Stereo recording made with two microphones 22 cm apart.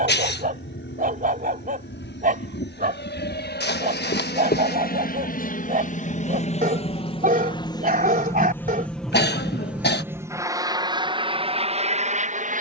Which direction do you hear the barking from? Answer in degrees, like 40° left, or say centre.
40° right.